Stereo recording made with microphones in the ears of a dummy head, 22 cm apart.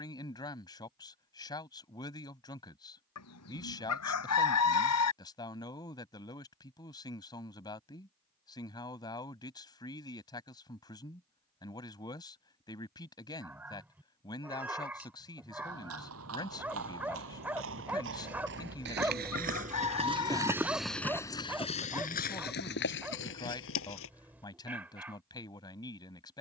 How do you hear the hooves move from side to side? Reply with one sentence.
You can hear the hooves move to the left.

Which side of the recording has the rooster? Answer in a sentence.
You can hear the rooster on the left.